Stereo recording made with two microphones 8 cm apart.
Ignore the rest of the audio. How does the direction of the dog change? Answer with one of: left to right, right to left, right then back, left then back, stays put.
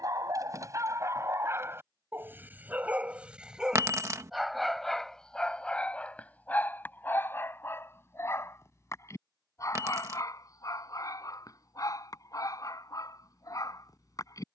right to left.